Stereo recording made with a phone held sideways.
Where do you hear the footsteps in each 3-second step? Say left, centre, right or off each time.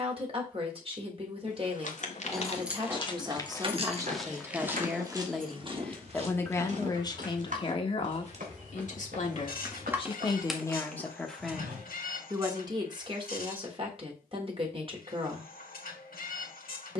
left, centre, right, right, off, off.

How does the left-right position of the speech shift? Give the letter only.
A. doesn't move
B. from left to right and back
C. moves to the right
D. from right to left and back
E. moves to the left
D.